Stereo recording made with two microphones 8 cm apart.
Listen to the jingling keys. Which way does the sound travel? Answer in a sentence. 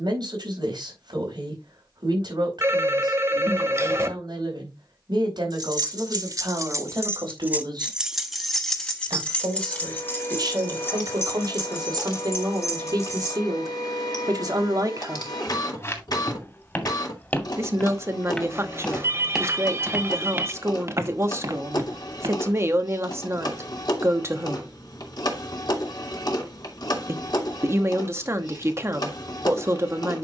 You can hear the jingling keys go from the right side to the left.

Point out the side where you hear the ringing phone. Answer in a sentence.
In this clip you hear the ringing phone on the right.